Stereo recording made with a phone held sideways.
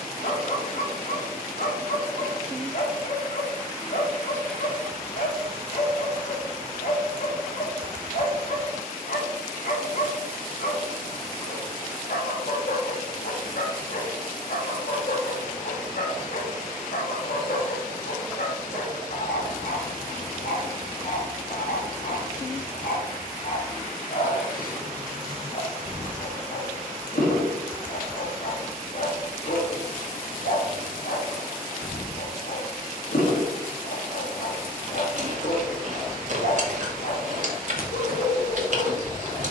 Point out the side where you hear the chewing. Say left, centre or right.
right.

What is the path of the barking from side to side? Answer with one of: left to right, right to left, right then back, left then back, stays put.
stays put.